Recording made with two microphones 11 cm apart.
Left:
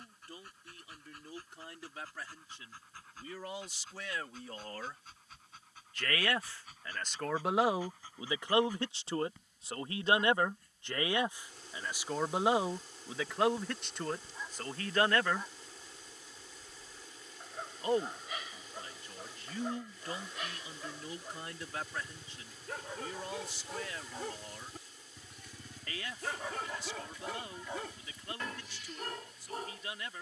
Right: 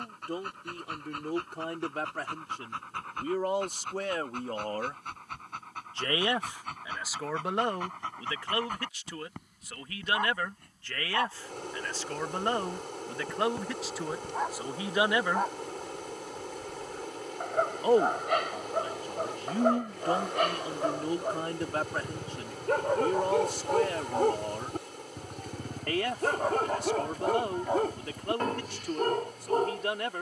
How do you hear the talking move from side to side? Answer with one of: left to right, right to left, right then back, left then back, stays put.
left then back.